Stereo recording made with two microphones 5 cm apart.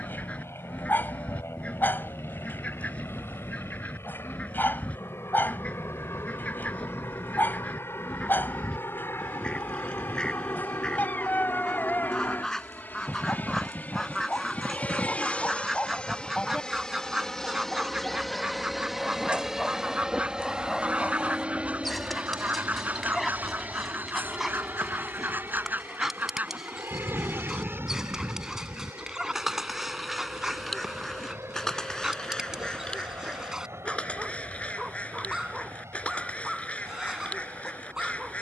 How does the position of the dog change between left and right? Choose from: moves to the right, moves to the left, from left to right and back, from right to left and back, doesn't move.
moves to the right.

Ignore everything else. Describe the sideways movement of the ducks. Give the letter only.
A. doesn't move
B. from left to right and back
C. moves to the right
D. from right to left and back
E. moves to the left
B.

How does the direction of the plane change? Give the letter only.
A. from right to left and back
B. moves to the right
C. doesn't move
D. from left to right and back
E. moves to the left
B.